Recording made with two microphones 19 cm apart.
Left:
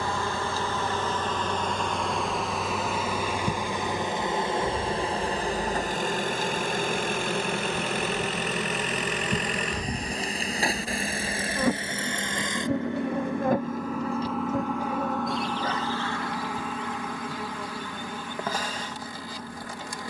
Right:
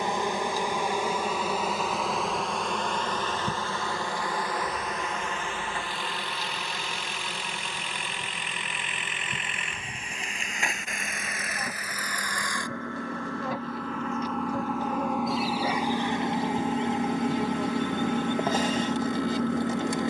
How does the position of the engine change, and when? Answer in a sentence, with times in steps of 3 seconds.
You can hear the engine on the left from 0 s, in the centre from 12 s and on the right from 15 s.